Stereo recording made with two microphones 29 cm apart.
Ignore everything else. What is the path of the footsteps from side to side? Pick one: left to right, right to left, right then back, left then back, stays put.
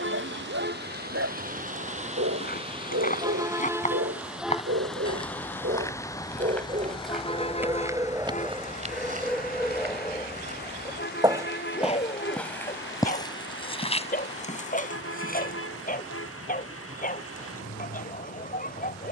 right then back.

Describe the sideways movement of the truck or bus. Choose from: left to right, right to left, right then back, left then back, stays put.
right to left.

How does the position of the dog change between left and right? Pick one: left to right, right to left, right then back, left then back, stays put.
right to left.